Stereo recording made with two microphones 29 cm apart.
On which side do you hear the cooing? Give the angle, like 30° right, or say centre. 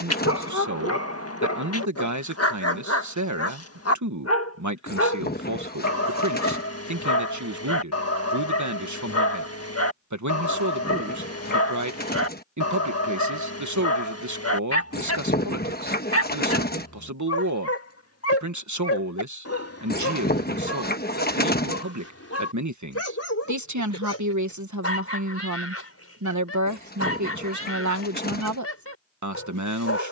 30° left.